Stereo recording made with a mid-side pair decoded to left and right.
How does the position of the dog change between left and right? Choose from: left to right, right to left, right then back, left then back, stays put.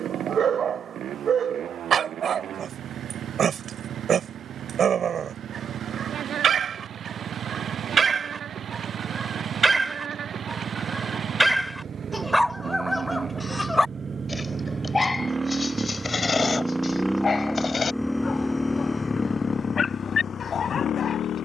right to left.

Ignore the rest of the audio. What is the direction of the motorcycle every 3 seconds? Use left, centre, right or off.
right, right, right, right, right, centre, left.